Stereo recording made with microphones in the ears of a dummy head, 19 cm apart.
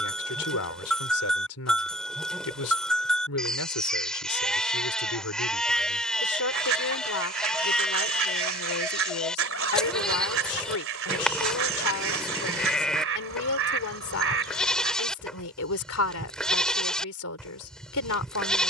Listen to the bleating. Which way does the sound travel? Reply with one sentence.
You can hear the bleating stay in one place.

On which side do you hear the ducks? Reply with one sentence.
You can hear the ducks on the right.